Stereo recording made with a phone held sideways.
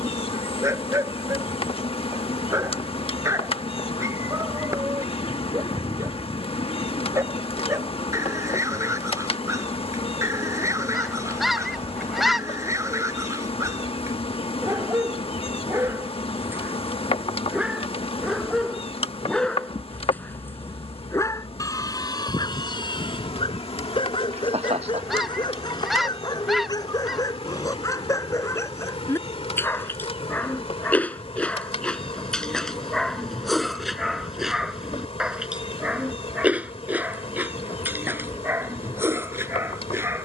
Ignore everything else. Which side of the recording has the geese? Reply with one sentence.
In this clip you hear the geese in the centre.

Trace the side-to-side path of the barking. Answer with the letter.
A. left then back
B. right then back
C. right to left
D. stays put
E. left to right
A.